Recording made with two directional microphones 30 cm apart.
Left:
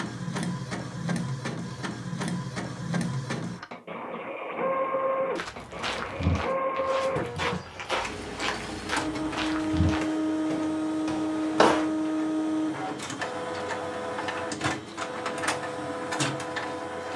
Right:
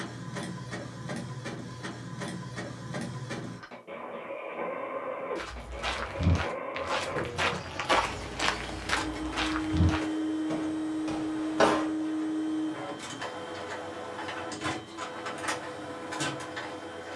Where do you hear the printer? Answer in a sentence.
You can hear the printer on the left.